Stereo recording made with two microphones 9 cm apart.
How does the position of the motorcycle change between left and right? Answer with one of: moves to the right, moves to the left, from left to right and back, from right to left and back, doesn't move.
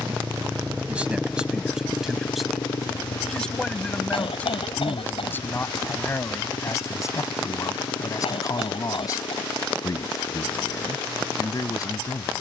moves to the left.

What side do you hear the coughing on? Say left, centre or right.
left.